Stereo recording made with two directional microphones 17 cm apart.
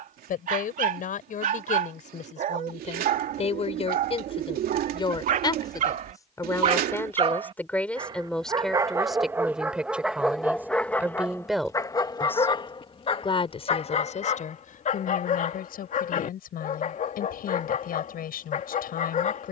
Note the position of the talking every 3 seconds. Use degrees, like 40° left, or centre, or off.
50° left, 30° left, 10° left, 10° right, 40° left, 60° left, 60° left.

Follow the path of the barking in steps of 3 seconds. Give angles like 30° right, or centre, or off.
50° right, 50° right, 30° right, centre, 40° left, 50° left, 50° left.